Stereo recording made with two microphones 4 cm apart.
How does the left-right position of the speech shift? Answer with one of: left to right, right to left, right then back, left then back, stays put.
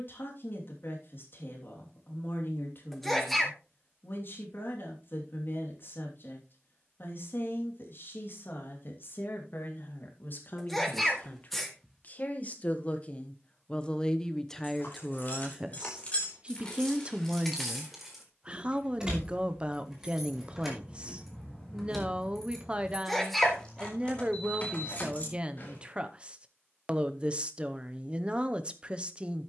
left to right.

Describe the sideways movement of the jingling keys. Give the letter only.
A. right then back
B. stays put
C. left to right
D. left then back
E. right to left
A.